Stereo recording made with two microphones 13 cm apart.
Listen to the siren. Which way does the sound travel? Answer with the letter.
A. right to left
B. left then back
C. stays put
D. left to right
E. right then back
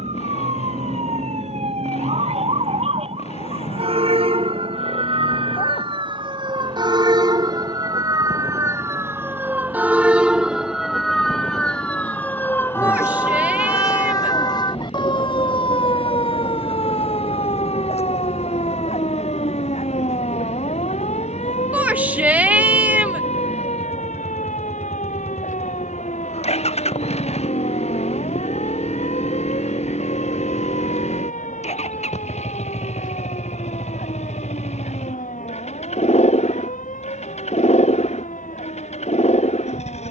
A.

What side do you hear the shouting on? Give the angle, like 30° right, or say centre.
10° right.